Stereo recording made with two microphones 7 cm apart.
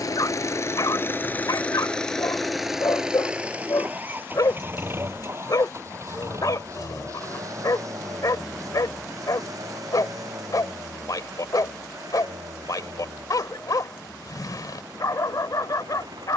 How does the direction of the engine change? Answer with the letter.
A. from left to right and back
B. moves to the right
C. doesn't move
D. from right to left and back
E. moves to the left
B.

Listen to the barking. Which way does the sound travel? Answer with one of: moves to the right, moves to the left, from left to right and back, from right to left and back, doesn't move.
doesn't move.